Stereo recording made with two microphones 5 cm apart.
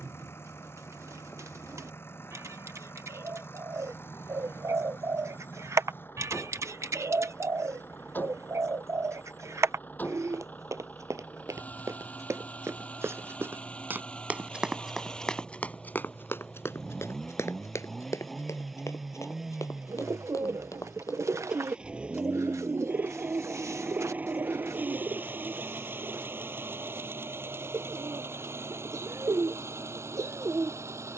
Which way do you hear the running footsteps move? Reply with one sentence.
In this clip you hear the running footsteps move from right to left.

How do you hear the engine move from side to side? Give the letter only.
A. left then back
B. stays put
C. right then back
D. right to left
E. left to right
E.